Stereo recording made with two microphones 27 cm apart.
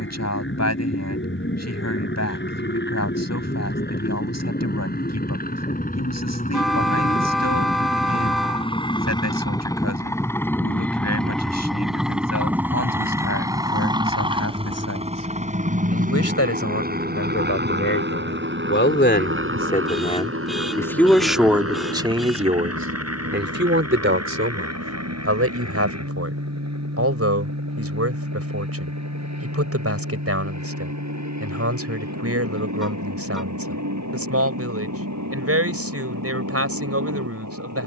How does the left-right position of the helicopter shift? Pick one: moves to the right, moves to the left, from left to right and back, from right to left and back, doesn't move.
moves to the right.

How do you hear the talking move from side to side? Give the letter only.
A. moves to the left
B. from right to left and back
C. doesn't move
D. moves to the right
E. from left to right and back
D.